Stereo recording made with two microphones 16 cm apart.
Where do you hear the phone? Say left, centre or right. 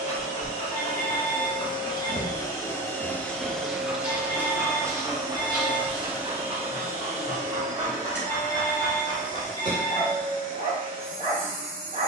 right.